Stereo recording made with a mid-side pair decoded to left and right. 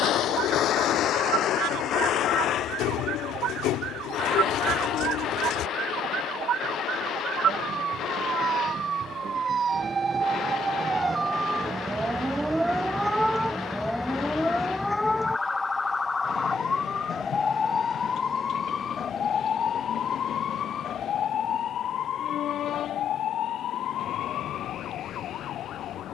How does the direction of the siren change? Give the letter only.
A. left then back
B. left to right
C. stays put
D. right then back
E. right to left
E.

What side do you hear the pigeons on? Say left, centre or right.
left.